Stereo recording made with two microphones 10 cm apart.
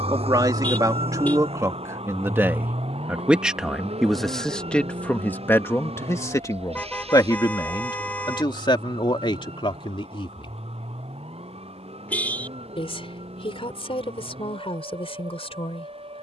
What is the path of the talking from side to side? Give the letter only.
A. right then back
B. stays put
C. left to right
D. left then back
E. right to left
E.